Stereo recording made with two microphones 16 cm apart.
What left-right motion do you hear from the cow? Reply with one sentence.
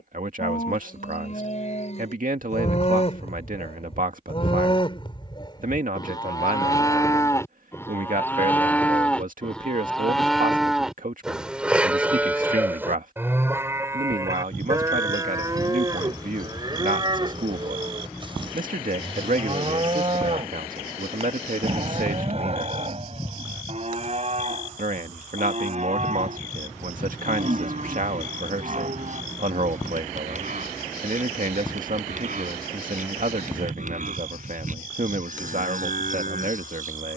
In this clip you hear the cow move from left to right.